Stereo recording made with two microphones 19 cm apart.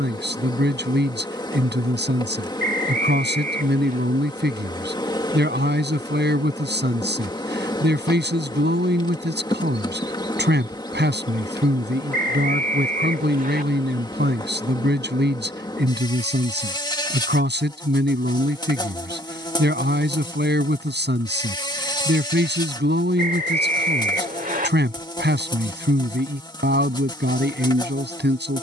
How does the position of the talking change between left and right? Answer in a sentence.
In this clip you hear the talking stay in one place.